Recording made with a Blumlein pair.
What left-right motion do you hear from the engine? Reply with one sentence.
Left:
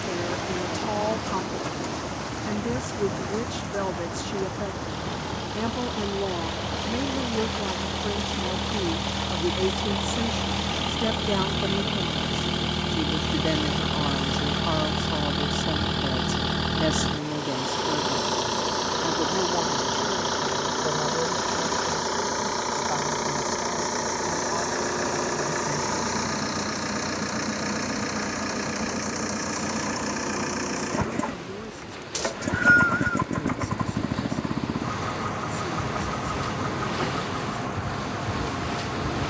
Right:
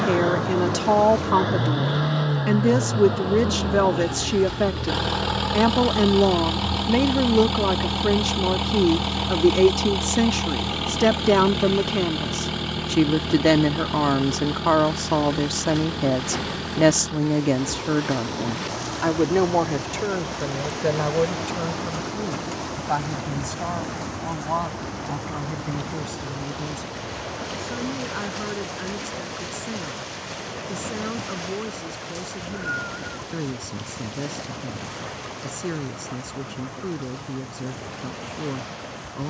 You can hear the engine move from right to left.